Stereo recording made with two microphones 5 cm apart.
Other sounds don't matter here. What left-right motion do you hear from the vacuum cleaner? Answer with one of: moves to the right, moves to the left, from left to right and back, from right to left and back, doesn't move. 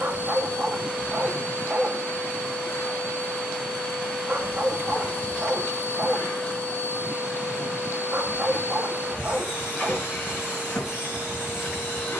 doesn't move.